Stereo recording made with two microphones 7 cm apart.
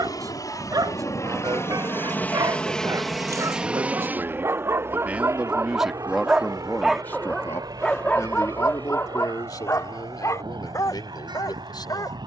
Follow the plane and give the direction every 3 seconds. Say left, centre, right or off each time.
left, right, right, right.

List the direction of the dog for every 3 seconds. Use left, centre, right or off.
right, right, centre, left.